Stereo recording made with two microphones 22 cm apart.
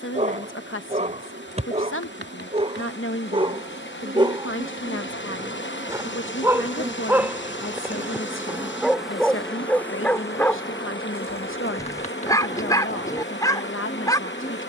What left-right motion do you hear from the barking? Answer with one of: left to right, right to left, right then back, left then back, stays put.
right to left.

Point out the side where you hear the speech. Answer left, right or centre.
left.